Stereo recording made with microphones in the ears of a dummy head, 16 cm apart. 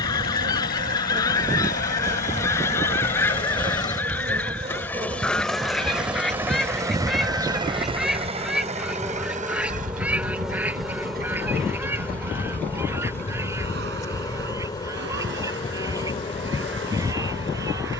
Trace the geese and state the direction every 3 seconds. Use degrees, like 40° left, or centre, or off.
20° left, 10° left, centre, 10° right, 10° right, 20° right.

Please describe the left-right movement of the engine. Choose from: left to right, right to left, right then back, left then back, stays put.
left to right.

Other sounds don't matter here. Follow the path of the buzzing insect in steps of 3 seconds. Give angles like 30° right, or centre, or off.
40° right, 30° right, 20° right, centre, 20° left, 30° left.